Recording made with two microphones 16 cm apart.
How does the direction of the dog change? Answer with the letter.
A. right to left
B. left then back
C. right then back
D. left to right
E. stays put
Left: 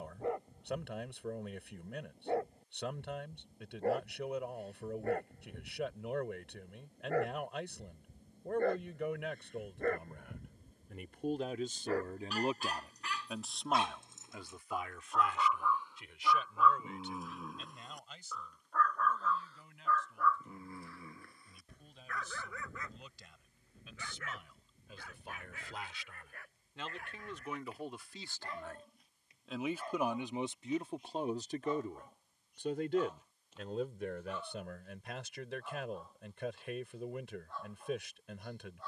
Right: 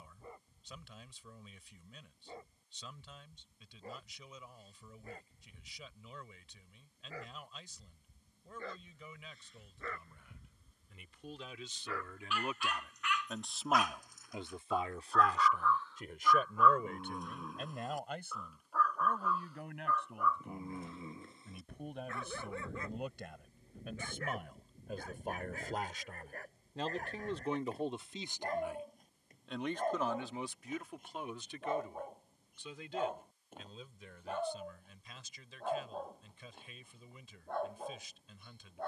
D.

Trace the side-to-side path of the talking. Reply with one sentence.
In this clip you hear the talking move from left to right and back again.